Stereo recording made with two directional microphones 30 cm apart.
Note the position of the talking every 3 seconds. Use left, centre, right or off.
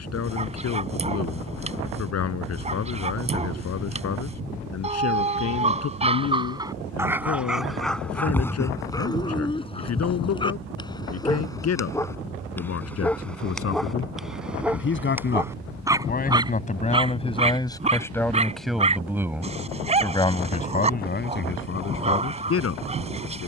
left, left, left, left, left, left, centre, left.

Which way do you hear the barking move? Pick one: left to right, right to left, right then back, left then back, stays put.
left then back.